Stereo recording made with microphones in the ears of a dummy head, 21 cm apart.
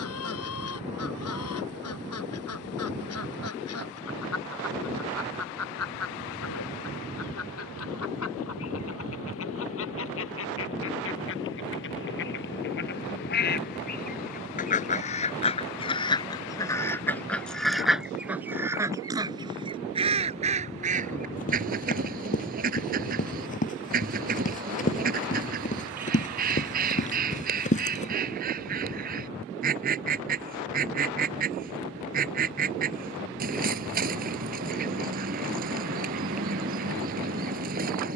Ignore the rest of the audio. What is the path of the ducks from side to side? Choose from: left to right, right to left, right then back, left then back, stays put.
left to right.